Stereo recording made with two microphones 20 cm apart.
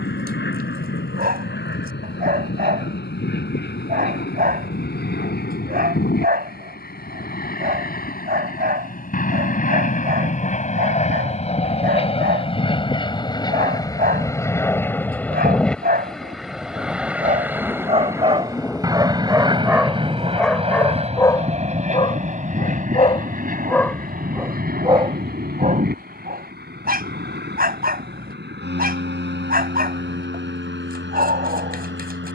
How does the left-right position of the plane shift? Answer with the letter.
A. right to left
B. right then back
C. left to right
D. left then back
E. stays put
C.